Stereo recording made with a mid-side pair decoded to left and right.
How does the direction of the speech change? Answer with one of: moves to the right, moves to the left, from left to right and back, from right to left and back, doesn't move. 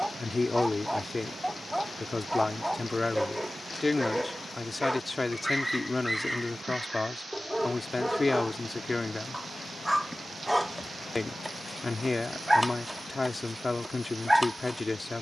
doesn't move.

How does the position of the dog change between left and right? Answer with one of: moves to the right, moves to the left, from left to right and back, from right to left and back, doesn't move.
doesn't move.